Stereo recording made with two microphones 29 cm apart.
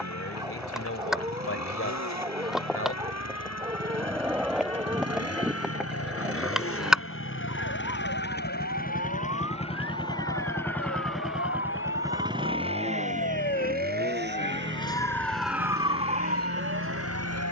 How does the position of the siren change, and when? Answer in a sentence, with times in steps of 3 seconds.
In this clip you hear the siren on the left from 0 s and on the right from 15 s.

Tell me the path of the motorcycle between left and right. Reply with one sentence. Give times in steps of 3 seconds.
You can hear the motorcycle on the left from 0 s, in the centre from 9 s and on the right from 12 s.